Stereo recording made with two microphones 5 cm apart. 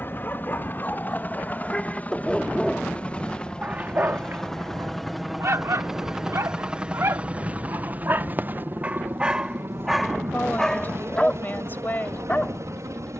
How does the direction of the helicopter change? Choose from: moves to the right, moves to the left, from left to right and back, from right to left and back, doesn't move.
moves to the right.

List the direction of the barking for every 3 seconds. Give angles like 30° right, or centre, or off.
30° left, 50° right, 50° right, centre, 30° left.